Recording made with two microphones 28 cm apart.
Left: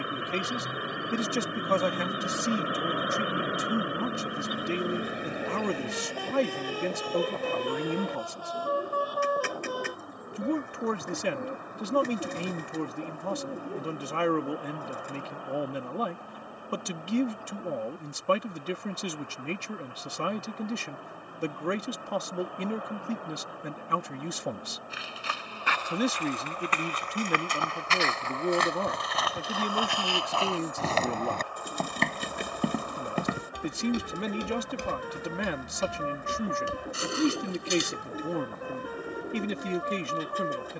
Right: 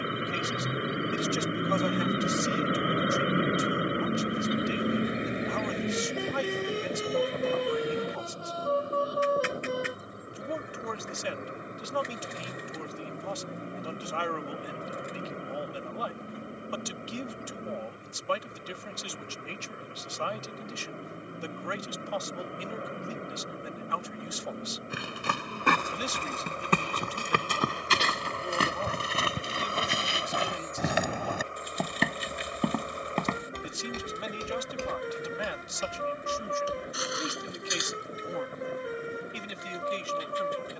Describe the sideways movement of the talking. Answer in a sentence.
In this clip you hear the talking stay put.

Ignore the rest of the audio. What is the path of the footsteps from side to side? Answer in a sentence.
In this clip you hear the footsteps move from right to left.